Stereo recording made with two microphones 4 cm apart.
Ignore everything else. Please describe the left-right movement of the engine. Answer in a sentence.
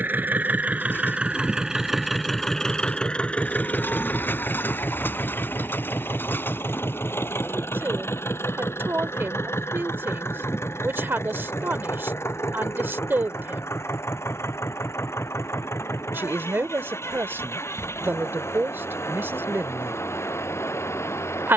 In this clip you hear the engine move to the left.